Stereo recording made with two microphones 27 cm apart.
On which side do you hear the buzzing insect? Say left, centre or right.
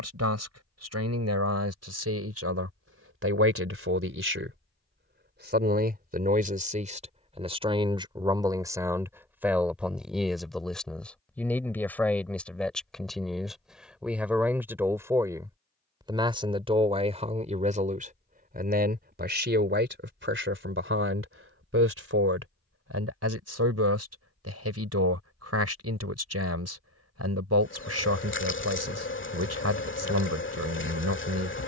left.